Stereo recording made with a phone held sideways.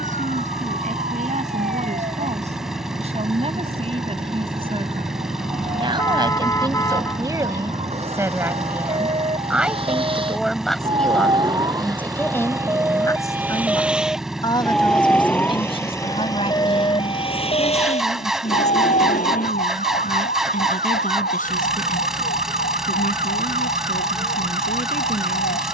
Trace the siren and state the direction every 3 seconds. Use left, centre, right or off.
right, right, right, right, centre, left, left, left, left.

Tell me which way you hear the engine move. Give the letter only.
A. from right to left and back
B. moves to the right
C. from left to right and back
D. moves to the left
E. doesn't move
E.